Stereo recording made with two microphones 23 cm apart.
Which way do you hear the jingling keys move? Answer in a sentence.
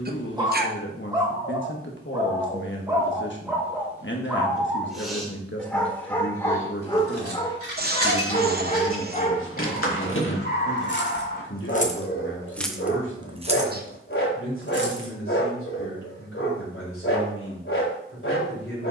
You can hear the jingling keys travel towards the right.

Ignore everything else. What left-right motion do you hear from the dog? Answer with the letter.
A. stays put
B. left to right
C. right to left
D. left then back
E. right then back
C.